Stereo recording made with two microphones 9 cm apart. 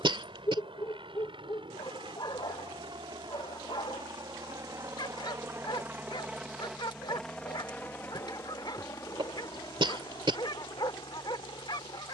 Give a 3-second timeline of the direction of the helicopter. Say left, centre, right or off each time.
right, right, centre, left.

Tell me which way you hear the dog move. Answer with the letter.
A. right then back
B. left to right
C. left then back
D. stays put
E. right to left
D.